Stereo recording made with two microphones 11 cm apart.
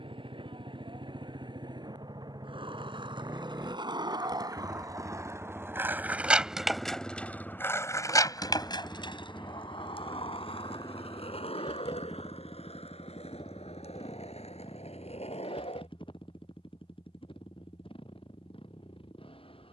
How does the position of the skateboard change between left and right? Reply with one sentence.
You can hear the skateboard travel towards the left.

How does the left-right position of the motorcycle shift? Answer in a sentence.
In this clip you hear the motorcycle go from the right side to the left.